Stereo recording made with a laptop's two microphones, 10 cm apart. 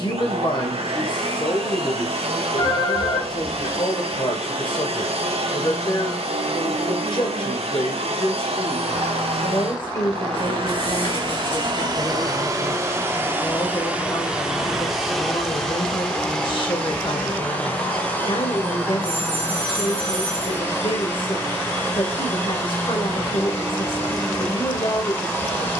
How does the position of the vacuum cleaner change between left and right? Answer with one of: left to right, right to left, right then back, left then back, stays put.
right to left.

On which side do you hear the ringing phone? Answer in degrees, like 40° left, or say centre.
60° left.